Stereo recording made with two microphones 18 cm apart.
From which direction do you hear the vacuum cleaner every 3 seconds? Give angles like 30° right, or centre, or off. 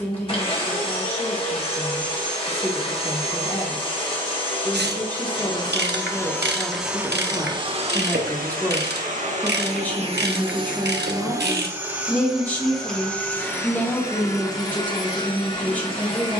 30° left, 30° left, 20° right, 30° right, 10° left, 30° left.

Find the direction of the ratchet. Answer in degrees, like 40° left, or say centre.
70° right.